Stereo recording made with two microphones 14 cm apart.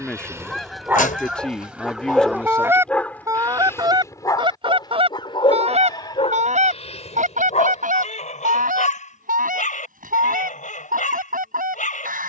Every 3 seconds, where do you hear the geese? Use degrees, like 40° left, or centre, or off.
10° right, 40° right, 70° right, 80° right.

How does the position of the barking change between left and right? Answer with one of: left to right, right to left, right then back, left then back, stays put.
right to left.